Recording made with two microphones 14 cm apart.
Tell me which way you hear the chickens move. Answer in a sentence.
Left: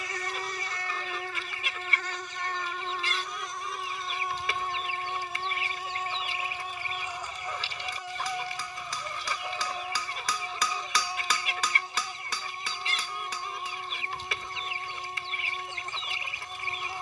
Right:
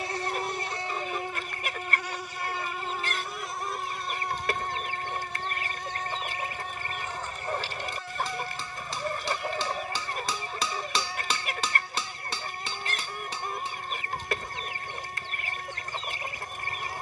You can hear the chickens stay in one place.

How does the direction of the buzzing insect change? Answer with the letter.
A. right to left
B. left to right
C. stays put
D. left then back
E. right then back
A.